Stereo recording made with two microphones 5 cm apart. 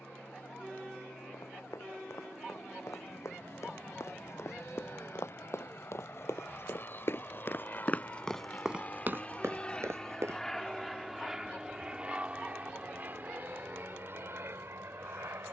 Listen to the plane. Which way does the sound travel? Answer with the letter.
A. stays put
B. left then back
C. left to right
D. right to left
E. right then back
C.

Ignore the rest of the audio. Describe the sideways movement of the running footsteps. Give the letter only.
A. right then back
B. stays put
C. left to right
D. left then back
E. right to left
C.